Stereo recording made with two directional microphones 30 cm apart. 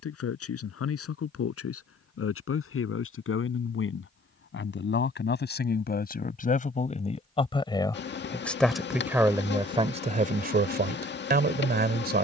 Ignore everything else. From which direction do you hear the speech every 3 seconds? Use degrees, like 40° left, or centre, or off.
50° left, 40° left, 20° left, 20° right.